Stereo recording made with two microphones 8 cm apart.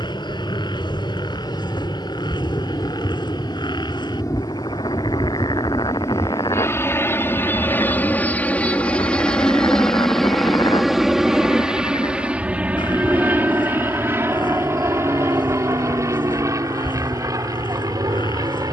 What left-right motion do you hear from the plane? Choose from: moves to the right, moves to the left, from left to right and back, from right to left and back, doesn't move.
moves to the right.